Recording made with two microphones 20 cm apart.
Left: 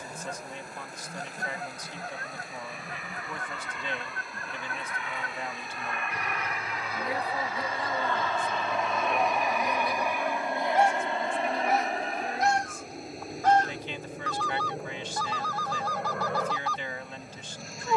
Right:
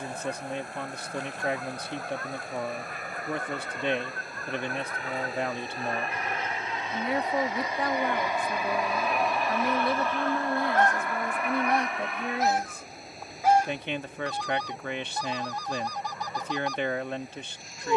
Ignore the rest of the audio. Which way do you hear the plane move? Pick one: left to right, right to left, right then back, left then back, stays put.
right to left.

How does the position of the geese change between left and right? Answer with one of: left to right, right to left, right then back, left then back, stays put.
left to right.